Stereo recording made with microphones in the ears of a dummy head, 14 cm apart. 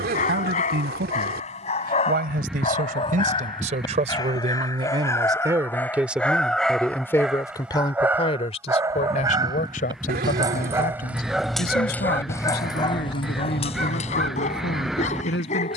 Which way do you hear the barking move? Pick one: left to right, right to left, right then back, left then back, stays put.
right then back.